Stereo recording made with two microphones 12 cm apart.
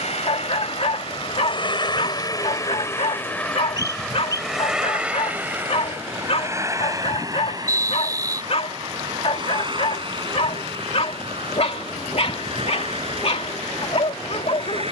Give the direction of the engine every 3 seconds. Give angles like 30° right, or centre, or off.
40° left, centre, 30° right, 40° right, 50° right.